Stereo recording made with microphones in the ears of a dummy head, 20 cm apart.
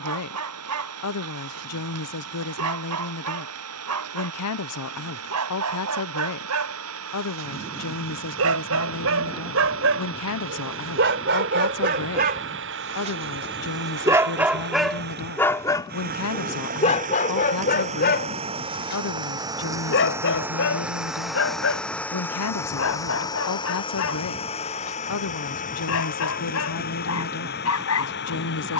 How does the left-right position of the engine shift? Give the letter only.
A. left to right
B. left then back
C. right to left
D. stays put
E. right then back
C.